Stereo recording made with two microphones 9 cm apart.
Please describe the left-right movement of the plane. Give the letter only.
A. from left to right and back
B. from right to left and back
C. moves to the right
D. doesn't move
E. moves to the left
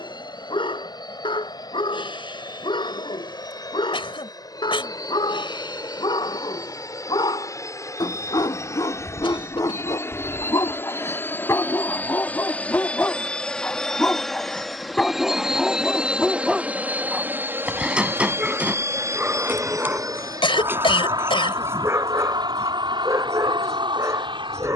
C.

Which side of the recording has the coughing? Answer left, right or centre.
left.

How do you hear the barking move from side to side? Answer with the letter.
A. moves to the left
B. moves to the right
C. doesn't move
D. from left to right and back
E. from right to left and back
B.